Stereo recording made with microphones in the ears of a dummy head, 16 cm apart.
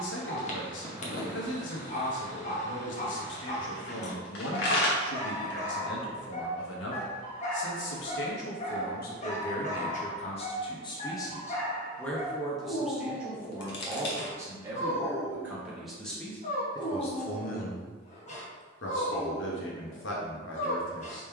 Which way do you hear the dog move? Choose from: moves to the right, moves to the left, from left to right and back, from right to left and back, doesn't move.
doesn't move.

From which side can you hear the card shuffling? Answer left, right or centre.
left.